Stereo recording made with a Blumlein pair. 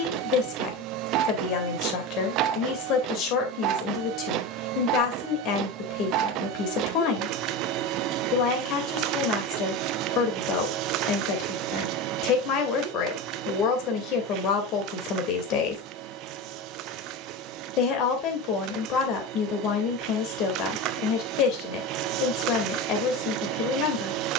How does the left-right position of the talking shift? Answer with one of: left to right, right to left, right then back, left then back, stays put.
stays put.